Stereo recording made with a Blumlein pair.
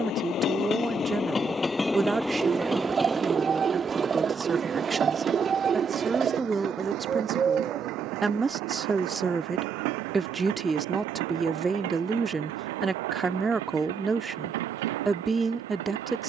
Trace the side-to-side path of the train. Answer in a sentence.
In this clip you hear the train move to the right.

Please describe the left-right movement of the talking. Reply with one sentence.
You can hear the talking stay in one place.